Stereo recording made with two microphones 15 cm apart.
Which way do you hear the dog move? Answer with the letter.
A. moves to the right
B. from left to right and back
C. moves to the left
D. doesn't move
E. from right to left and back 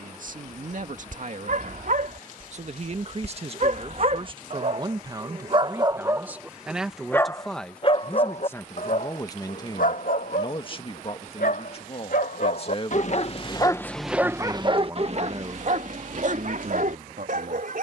E.